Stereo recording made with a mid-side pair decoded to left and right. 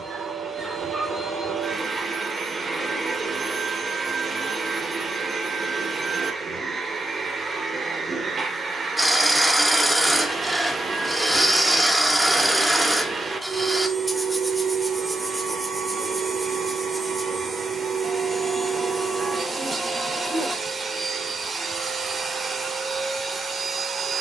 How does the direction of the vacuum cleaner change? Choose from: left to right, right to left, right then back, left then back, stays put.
stays put.